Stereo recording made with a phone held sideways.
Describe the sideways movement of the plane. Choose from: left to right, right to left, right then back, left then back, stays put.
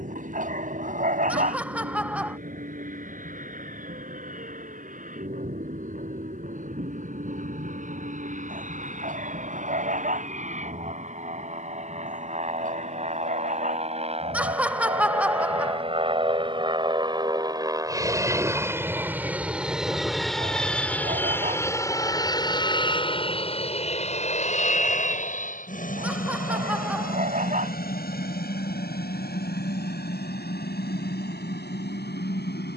right to left.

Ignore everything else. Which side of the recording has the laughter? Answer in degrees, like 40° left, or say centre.
10° right.